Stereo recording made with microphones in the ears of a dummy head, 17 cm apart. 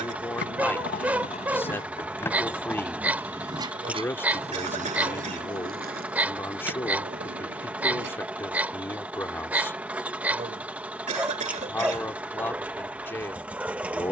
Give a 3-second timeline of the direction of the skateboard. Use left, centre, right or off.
left, right, right, off, off.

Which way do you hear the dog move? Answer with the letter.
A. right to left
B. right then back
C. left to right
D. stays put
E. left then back
D.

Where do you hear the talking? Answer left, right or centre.
centre.